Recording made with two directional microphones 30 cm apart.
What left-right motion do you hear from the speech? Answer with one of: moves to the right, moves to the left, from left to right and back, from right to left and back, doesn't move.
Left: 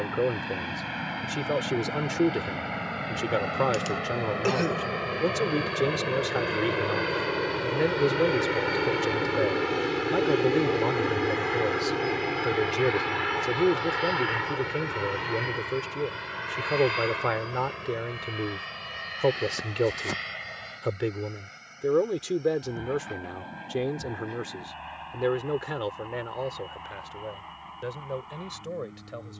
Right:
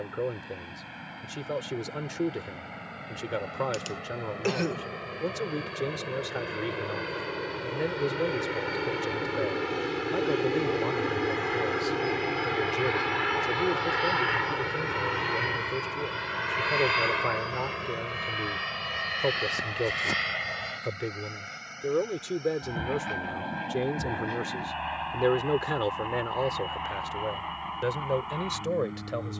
moves to the right.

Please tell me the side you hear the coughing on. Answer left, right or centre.
centre.